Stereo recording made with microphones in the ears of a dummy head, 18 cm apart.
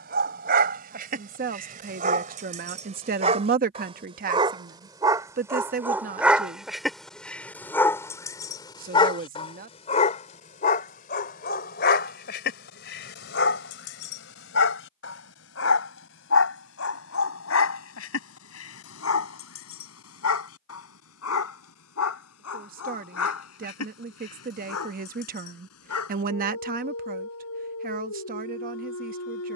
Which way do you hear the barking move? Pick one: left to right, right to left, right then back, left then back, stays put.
right to left.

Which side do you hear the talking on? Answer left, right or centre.
right.